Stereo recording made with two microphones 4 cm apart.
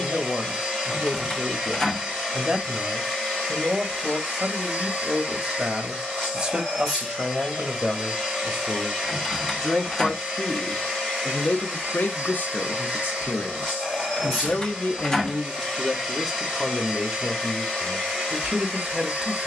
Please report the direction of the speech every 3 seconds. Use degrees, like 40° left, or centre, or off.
20° right, 20° right, 10° right, 20° left, 40° left, centre, 10° right.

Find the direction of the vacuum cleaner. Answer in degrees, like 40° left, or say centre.
10° right.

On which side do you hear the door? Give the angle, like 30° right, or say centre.
20° left.